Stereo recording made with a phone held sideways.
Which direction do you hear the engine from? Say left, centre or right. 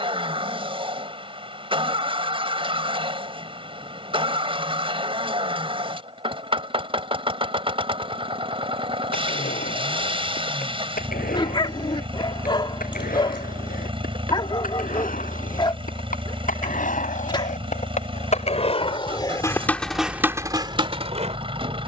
right.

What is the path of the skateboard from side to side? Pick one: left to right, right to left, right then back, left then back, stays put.
left to right.